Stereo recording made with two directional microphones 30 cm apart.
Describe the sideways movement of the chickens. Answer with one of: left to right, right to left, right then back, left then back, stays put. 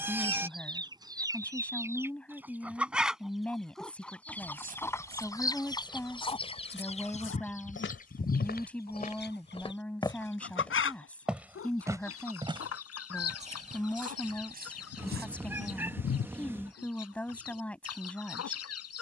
right to left.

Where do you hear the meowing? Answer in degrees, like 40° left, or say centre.
10° right.